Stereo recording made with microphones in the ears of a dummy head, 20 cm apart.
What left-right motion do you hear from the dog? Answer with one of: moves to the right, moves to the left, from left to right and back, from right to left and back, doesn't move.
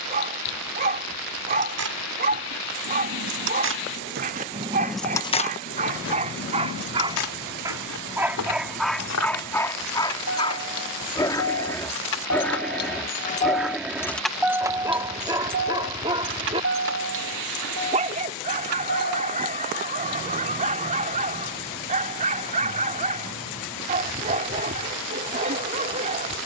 from right to left and back.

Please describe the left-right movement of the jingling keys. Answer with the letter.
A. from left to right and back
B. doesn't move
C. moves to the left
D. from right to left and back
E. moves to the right
D.